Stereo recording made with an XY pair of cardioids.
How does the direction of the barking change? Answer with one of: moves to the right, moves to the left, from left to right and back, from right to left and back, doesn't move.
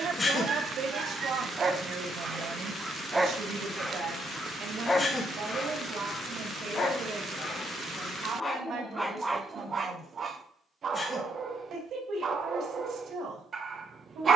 from right to left and back.